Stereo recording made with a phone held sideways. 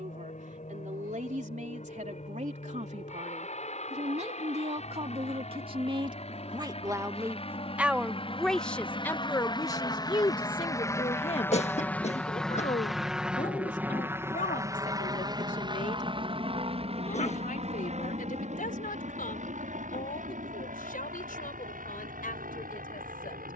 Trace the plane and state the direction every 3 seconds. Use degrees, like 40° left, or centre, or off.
70° left, 60° left, 50° left, 30° left, 10° right, 40° right, 60° right, 70° right.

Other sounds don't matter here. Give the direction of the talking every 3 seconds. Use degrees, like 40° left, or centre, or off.
60° right, 50° right, 10° right, 30° left, 60° left, 70° left, 80° left, 80° left.